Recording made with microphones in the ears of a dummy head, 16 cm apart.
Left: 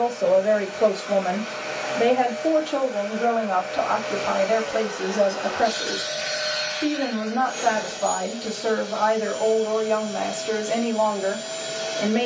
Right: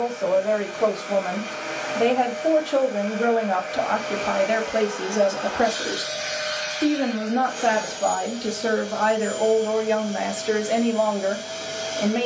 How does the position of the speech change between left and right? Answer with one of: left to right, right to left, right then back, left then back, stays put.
right then back.